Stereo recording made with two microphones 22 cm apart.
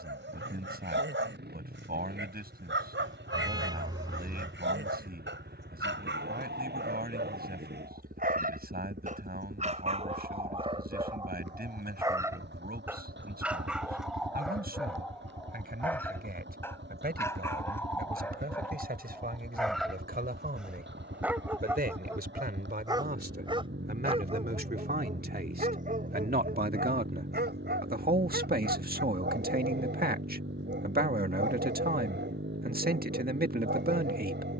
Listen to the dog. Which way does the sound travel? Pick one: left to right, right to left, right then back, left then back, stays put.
left then back.